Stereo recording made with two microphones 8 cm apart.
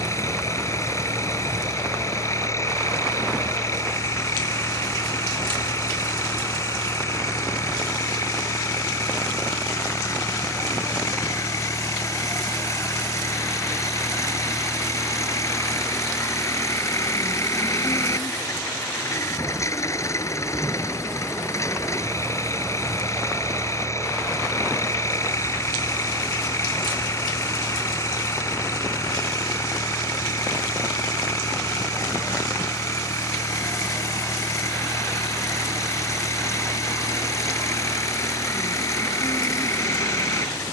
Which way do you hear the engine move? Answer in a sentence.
You can hear the engine stay put.